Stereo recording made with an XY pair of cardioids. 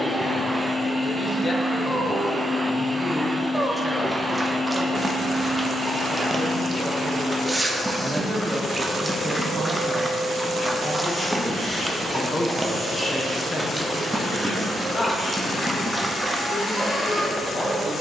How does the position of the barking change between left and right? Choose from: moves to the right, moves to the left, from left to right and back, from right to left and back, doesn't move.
doesn't move.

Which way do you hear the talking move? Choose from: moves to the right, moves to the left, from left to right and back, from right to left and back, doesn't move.
from left to right and back.